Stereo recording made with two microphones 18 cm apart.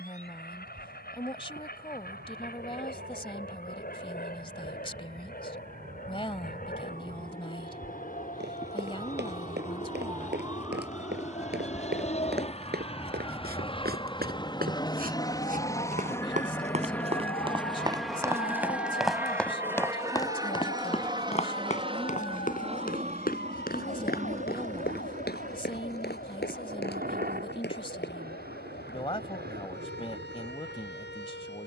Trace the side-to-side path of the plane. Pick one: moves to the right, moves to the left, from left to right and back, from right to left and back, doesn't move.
moves to the right.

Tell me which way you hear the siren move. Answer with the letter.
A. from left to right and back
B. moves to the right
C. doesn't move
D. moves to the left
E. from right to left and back
D.